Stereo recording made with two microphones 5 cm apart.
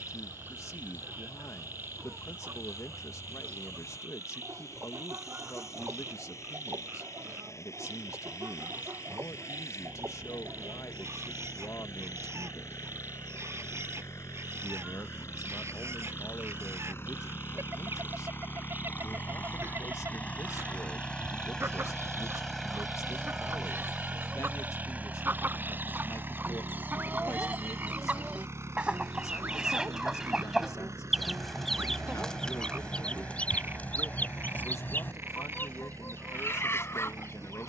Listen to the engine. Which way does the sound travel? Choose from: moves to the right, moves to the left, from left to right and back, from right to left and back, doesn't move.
moves to the right.